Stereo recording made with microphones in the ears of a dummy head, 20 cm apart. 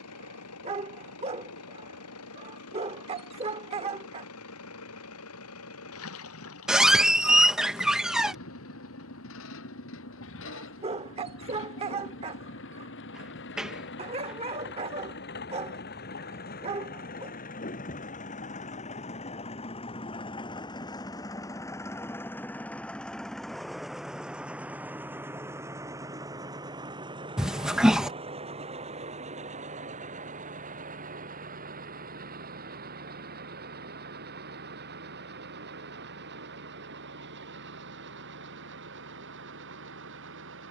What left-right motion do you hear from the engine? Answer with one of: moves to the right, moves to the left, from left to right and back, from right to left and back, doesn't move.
moves to the right.